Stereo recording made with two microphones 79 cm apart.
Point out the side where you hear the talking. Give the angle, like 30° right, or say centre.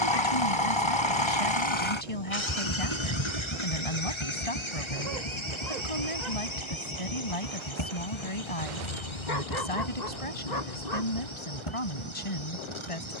40° left.